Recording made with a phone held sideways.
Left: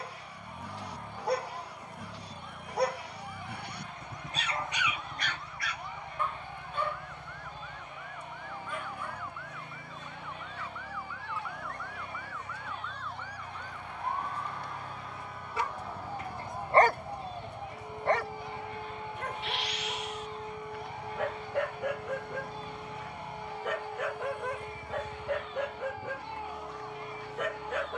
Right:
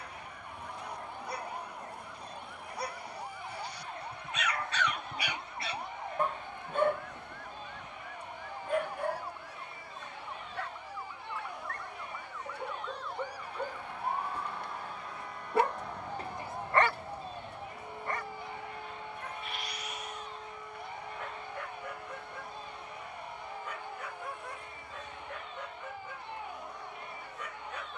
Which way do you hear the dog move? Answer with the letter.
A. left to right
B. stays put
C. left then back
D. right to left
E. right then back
E.